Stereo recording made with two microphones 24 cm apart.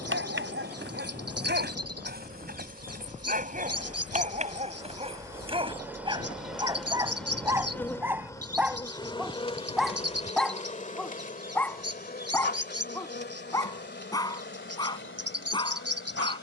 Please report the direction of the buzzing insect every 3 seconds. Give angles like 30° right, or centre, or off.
40° right, 20° right, 10° left, 30° left, 50° left, 50° left.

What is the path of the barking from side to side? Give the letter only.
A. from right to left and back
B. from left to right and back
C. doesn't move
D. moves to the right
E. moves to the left
E.